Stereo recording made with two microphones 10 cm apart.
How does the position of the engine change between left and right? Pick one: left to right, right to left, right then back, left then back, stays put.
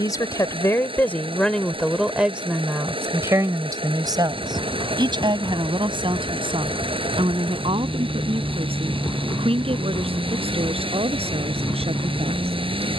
stays put.